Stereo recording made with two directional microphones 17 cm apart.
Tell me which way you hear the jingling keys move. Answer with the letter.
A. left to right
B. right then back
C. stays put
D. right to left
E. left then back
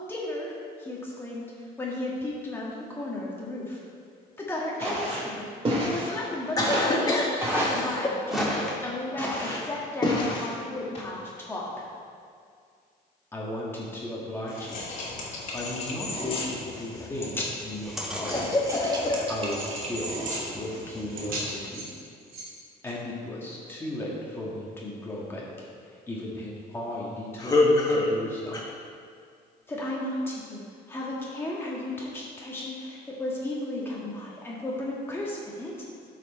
A.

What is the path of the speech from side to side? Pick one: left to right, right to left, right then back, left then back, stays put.
stays put.